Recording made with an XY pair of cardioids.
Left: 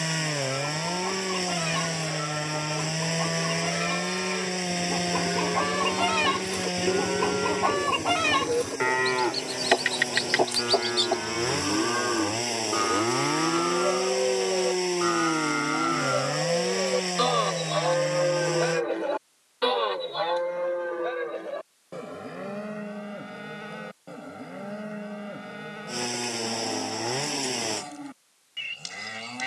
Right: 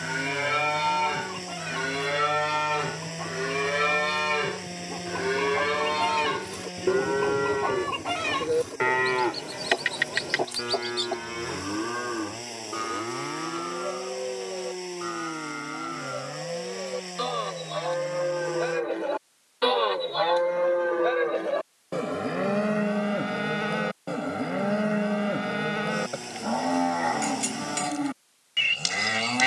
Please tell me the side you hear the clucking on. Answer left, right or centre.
left.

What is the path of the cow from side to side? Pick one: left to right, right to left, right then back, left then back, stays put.
left then back.